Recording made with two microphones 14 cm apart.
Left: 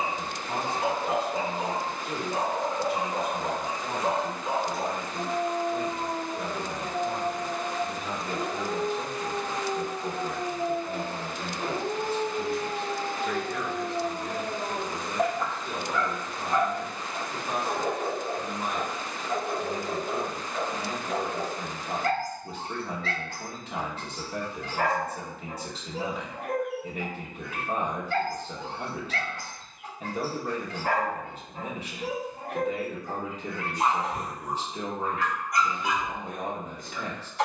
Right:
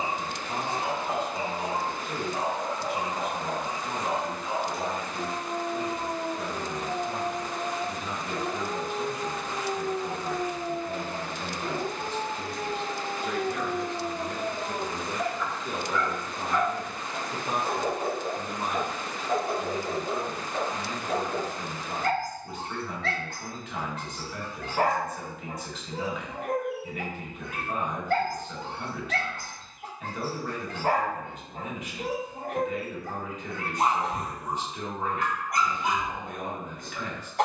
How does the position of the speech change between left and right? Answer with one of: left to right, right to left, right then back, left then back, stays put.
right then back.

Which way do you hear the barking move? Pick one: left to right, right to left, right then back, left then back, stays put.
left to right.